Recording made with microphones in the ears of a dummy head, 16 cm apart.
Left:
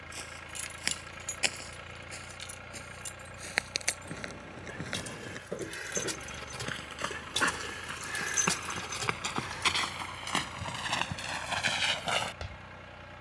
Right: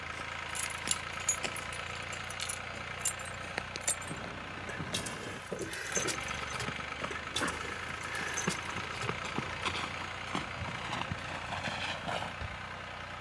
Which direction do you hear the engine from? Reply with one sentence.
You can hear the engine on the right.